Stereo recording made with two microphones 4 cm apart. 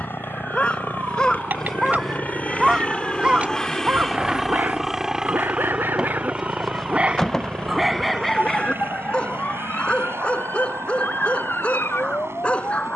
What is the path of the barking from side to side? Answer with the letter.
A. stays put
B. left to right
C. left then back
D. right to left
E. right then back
E.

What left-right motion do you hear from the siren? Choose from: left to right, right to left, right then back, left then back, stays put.
right to left.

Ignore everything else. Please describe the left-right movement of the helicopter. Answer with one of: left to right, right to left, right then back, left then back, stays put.
left to right.